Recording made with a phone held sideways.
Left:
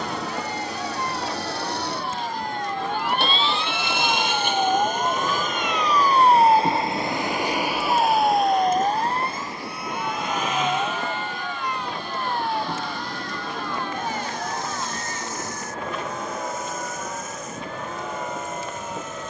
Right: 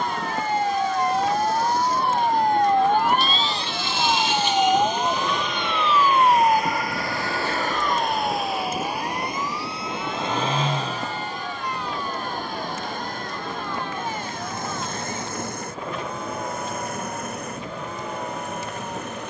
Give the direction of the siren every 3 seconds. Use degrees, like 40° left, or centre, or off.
70° right, 20° right, 30° left, 50° left, 60° left, 60° left, 70° left.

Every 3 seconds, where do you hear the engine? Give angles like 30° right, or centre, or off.
70° left, 50° left, 10° left, 30° right, 50° right, 60° right, 60° right.